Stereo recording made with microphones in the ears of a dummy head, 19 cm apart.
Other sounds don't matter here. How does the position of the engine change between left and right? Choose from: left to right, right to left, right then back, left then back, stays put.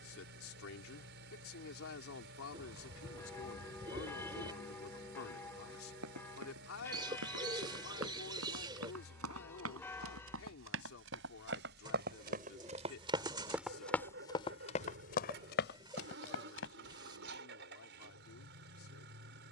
stays put.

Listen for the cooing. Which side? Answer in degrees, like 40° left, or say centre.
20° right.